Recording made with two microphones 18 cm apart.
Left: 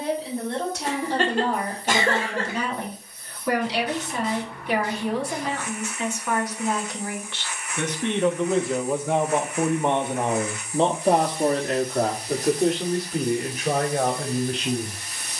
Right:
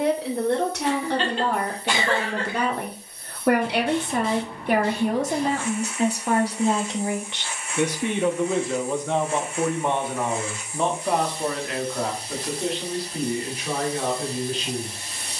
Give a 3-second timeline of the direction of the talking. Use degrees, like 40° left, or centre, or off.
60° right, 50° right, 20° right, 30° left, 50° left.